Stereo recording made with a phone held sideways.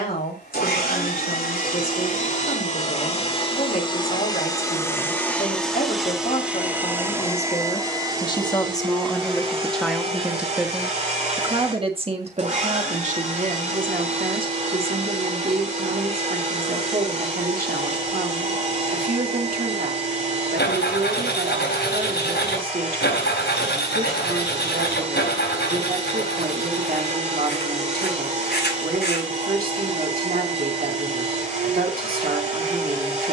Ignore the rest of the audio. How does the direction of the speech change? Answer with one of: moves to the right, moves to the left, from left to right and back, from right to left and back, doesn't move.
moves to the right.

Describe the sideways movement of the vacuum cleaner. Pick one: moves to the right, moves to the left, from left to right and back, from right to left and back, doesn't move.
moves to the right.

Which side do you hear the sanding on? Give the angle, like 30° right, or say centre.
80° left.